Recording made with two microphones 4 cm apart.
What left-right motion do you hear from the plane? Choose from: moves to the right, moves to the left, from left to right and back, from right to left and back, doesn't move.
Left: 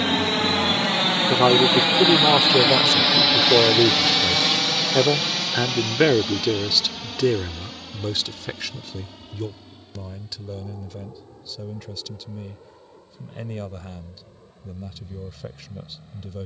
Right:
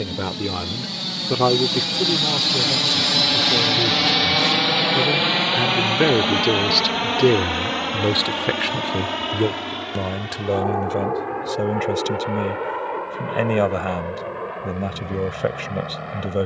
moves to the right.